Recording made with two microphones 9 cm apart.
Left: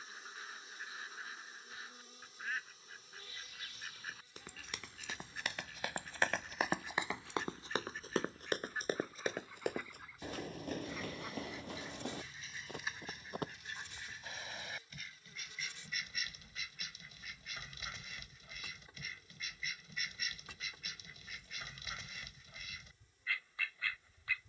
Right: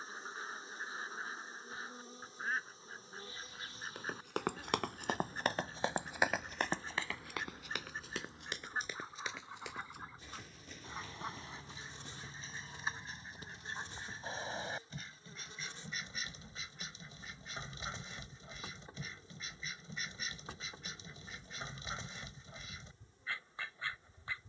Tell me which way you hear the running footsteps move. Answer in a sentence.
In this clip you hear the running footsteps travel towards the left.